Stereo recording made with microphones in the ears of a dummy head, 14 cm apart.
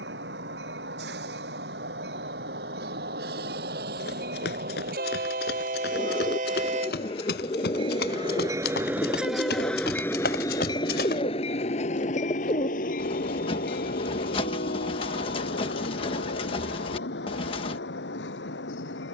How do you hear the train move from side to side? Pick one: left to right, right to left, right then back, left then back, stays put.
right to left.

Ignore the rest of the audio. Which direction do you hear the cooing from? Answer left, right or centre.
left.